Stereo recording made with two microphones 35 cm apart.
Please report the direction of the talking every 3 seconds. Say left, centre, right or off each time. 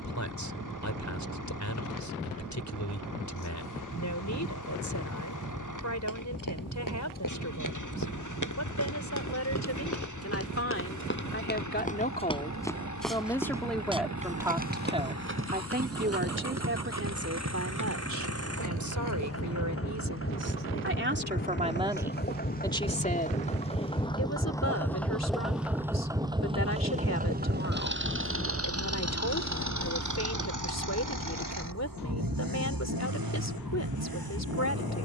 left, left, left, left, centre, right, right, centre, left, left, left, left.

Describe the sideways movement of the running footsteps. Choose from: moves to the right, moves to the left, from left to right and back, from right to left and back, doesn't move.
moves to the right.